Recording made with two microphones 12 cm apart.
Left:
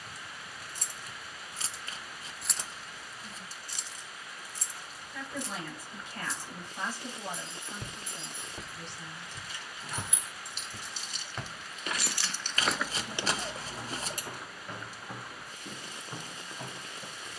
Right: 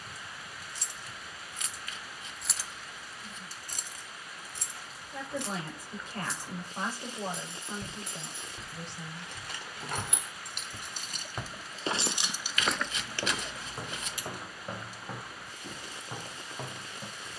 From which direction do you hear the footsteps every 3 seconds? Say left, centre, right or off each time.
off, off, left, centre, right, right.